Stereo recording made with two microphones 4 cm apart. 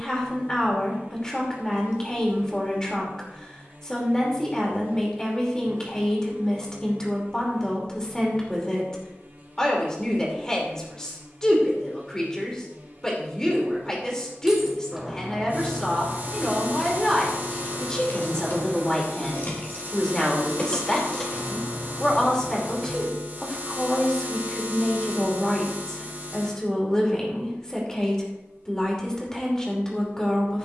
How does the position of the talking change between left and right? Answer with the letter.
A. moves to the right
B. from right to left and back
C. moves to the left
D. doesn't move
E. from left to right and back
D.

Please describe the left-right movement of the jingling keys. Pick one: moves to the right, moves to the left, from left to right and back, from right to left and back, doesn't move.
from right to left and back.